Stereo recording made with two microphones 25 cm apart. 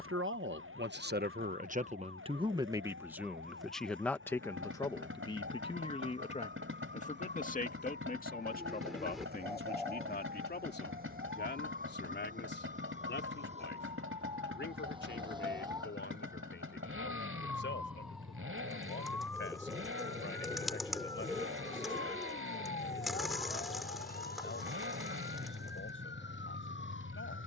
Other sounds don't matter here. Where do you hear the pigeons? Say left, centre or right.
centre.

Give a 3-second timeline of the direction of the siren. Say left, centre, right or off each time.
right, right, right, right, right, centre, centre, left, left.